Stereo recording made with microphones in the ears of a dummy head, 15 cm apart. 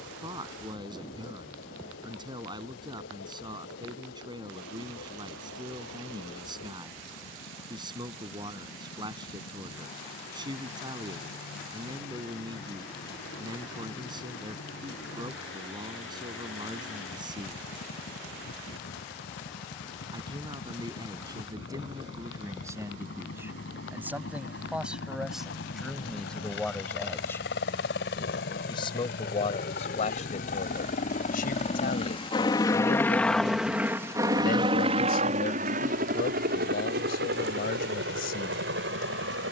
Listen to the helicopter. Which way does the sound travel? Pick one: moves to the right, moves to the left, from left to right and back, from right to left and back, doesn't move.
moves to the right.